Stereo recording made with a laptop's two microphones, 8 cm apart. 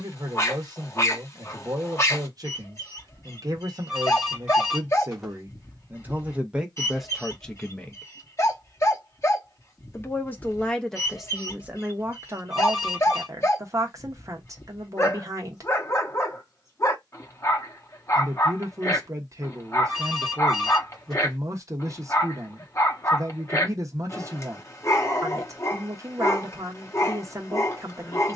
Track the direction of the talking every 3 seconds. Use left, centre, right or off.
right, right, centre, centre, right, right, right, right, right, right.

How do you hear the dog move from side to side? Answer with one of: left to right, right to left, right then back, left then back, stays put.
stays put.